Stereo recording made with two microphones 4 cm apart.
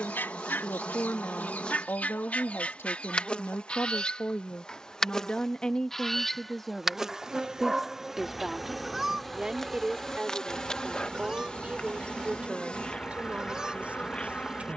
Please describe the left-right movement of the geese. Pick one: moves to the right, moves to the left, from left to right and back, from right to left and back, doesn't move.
moves to the right.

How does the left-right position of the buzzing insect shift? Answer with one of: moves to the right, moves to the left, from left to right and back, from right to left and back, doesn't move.
from left to right and back.